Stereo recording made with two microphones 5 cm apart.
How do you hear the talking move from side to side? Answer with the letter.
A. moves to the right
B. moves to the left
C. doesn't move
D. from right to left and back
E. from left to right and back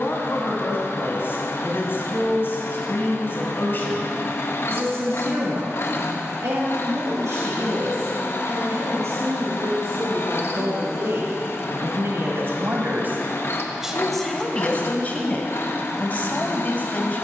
E.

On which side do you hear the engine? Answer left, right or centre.
left.